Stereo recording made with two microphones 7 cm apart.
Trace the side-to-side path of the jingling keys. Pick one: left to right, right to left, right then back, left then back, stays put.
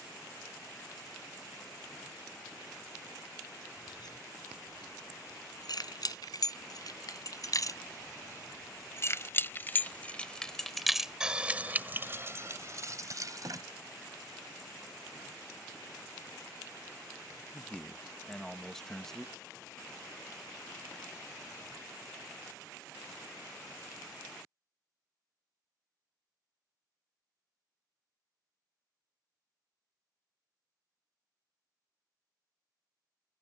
left to right.